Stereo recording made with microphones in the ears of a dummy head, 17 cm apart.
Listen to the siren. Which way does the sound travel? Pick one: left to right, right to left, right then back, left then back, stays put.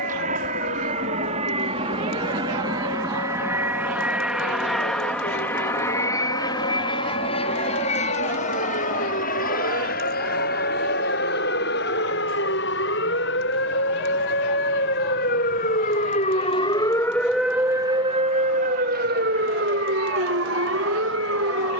left to right.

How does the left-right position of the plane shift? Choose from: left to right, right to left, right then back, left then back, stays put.
right to left.